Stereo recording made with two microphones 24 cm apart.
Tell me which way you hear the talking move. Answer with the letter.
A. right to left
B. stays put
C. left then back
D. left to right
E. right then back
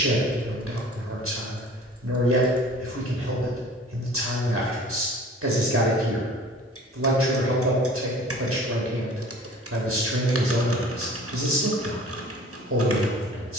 B.